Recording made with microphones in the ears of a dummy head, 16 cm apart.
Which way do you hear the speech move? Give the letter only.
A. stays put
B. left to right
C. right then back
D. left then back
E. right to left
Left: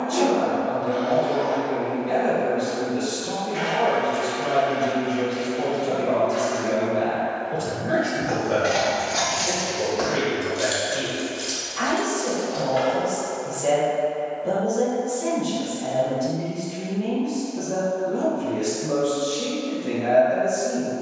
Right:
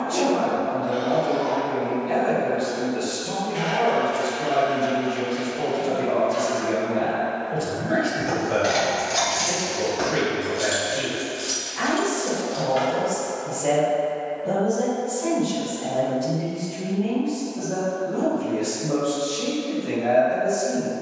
A.